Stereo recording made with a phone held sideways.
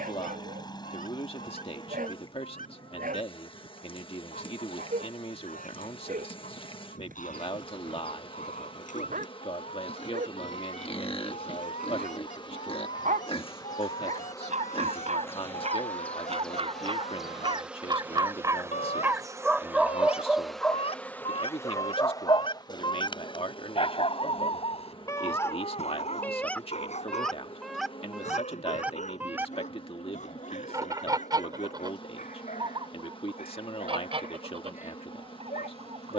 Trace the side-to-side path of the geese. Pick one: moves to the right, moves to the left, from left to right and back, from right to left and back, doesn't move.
moves to the right.